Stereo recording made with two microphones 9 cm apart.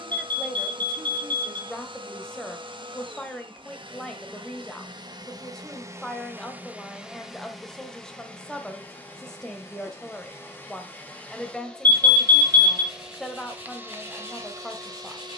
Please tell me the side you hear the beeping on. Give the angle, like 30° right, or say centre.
20° left.